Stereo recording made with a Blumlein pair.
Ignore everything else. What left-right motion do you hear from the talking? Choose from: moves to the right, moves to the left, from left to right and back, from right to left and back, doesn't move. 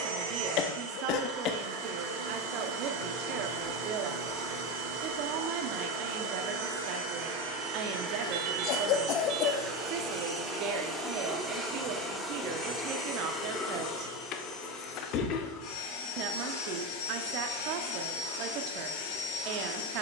doesn't move.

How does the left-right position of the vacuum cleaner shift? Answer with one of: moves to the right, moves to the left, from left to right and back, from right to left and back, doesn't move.
moves to the left.